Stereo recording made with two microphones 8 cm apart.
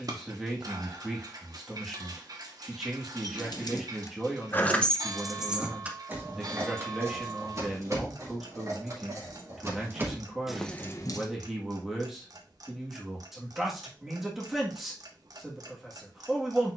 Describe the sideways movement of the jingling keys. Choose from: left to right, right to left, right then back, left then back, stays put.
right then back.